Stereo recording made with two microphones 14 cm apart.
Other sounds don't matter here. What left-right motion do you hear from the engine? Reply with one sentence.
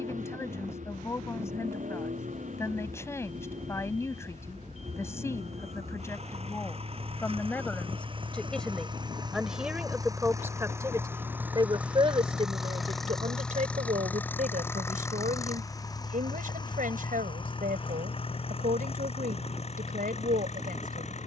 In this clip you hear the engine move from right to left.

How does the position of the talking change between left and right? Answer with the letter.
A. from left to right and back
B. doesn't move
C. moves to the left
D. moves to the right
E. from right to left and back
D.